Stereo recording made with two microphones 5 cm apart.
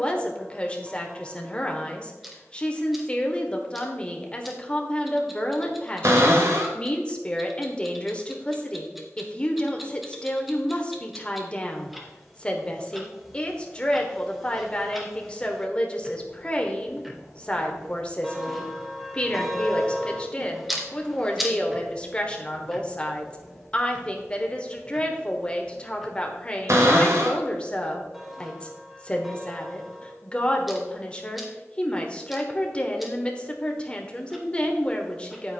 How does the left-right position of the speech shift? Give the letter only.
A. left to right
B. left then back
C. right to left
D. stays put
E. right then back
D.